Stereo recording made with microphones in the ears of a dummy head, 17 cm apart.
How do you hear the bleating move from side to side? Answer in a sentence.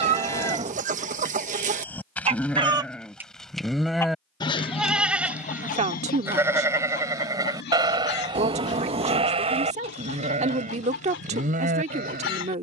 You can hear the bleating travel towards the right.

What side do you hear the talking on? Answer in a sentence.
In this clip you hear the talking on the right.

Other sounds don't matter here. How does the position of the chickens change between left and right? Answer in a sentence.
In this clip you hear the chickens go from the right side to the left.